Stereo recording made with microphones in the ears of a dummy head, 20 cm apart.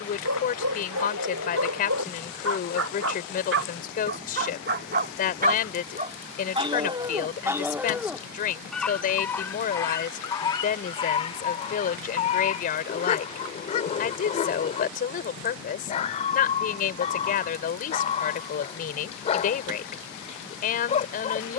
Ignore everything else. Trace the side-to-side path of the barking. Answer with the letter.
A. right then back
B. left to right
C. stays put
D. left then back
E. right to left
E.